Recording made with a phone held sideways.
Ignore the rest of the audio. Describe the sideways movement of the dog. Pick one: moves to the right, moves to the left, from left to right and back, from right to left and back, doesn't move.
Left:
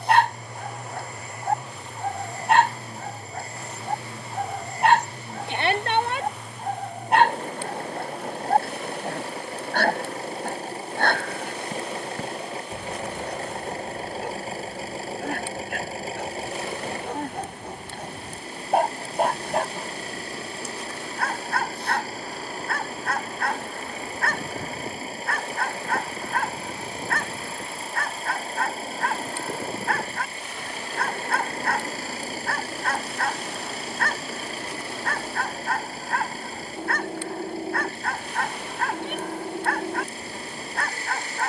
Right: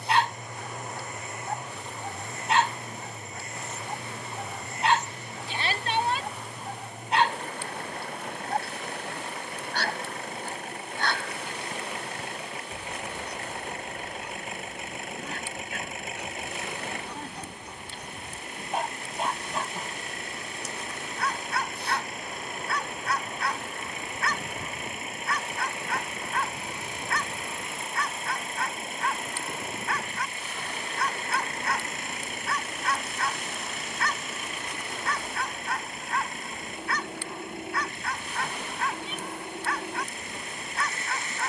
doesn't move.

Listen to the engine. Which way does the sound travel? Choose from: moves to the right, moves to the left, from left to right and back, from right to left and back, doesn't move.
doesn't move.